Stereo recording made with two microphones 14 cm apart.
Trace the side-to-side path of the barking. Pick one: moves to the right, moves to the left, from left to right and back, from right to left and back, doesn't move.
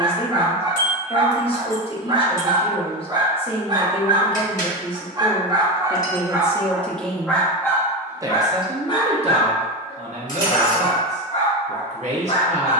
moves to the left.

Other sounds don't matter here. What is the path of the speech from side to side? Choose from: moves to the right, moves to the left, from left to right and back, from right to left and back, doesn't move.
moves to the right.